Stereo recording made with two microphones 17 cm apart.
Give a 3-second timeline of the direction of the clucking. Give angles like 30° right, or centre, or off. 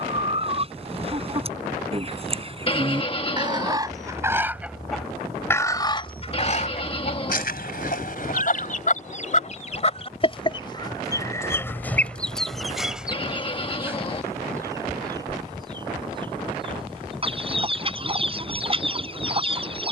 40° right, 10° right, 50° left, 30° left, centre, 30° right, 30° right.